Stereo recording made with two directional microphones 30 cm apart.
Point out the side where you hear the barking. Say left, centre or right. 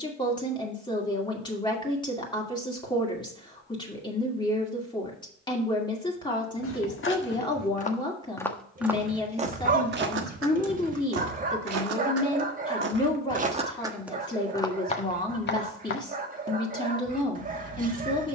right.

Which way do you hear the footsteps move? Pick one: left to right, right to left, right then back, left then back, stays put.
right then back.